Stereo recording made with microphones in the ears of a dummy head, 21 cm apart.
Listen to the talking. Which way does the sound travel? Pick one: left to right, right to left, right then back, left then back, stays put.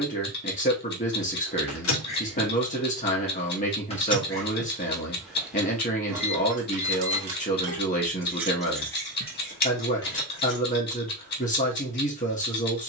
stays put.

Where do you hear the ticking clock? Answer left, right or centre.
left.